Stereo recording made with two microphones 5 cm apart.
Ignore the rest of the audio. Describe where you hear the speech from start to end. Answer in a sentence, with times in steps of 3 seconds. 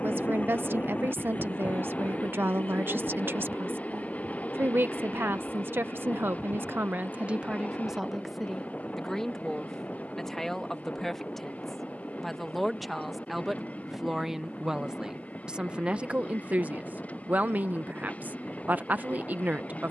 You can hear the speech on the right from 0 s, in the centre from 9 s and on the right from 15 s.